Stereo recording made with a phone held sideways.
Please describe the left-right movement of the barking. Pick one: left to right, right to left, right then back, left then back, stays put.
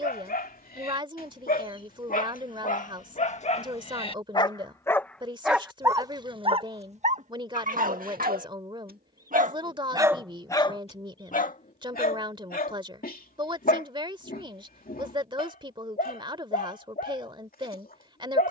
right then back.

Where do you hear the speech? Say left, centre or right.
right.